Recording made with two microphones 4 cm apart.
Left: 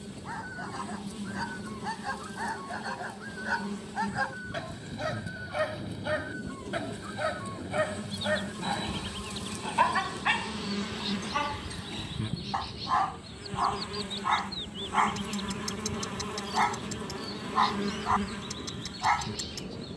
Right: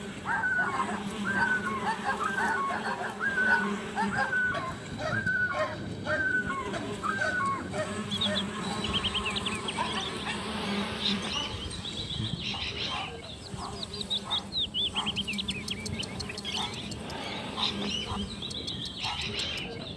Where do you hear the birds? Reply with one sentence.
You can hear the birds on the right.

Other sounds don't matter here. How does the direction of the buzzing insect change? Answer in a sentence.
In this clip you hear the buzzing insect travel towards the left.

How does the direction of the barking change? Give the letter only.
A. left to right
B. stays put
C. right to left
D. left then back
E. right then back
C.